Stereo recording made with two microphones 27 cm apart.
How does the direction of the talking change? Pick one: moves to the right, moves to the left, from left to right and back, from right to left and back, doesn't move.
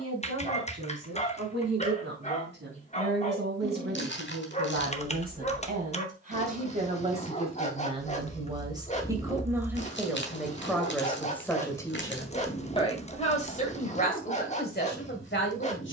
moves to the left.